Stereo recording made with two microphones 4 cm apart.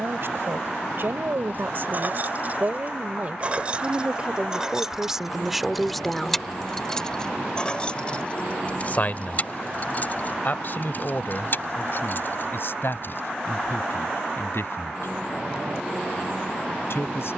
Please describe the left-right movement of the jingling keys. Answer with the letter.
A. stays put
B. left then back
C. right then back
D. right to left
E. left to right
D.